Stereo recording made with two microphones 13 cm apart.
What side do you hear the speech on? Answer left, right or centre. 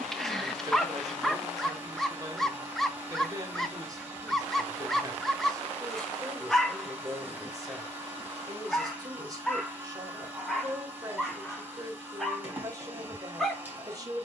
right.